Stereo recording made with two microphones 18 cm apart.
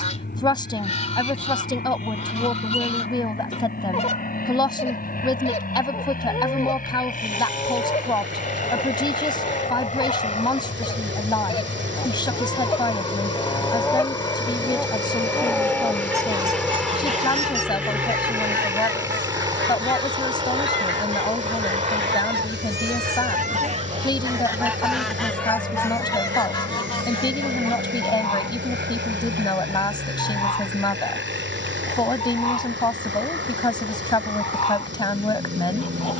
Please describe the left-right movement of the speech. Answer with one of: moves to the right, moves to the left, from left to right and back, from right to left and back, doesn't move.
doesn't move.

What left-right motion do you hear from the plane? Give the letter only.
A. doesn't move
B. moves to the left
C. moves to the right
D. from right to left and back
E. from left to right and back
C.